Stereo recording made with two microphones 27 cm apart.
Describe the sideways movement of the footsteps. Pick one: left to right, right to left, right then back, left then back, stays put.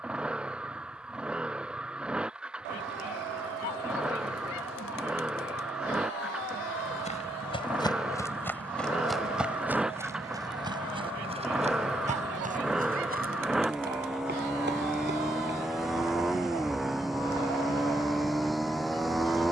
left to right.